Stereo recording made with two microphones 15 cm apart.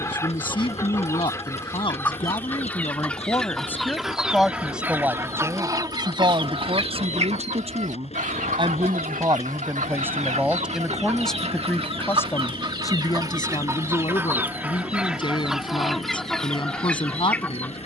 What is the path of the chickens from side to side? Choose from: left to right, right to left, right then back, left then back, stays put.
right then back.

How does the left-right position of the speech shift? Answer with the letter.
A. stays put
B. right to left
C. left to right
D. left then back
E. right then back
E.